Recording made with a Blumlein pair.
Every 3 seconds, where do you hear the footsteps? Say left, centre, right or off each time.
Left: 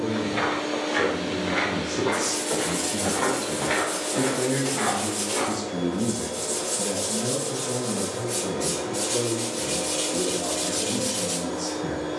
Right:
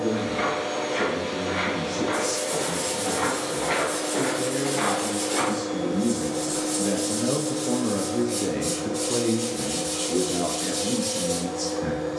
left, centre, right, off.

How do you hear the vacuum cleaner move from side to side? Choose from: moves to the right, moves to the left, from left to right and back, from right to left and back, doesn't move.
moves to the left.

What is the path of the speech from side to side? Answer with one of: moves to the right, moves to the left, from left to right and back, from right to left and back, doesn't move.
moves to the right.